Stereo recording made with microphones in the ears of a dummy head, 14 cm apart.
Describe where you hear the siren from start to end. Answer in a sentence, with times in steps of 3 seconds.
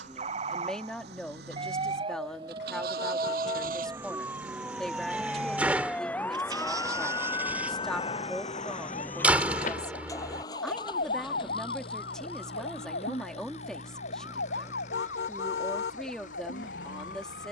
In this clip you hear the siren on the right from 0 s, in the centre from 3 s and on the left from 6 s.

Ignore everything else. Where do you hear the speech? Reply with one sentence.
In this clip you hear the speech in the centre.